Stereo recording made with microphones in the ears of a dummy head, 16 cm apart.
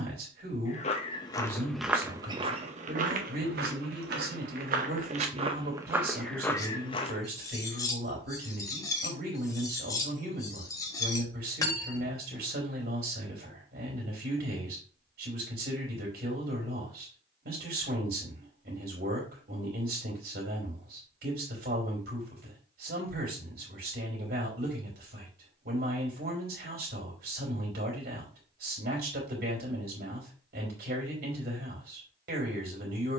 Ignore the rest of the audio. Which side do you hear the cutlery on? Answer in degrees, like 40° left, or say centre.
20° left.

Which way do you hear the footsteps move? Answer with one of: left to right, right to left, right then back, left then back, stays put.
right then back.